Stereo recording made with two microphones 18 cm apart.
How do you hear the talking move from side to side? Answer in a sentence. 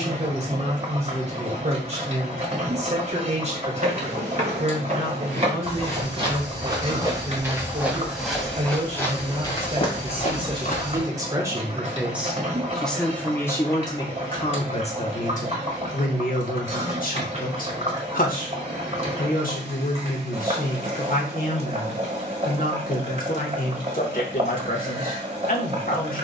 In this clip you hear the talking move from right to left.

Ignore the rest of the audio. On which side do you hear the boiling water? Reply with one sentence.
You can hear the boiling water on the right.